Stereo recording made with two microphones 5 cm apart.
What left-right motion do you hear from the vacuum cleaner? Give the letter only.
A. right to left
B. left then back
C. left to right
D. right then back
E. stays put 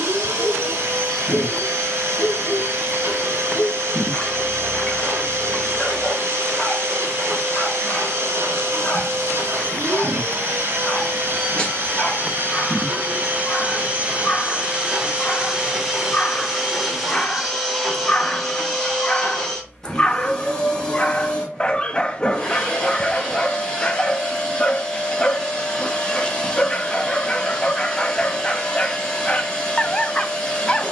A.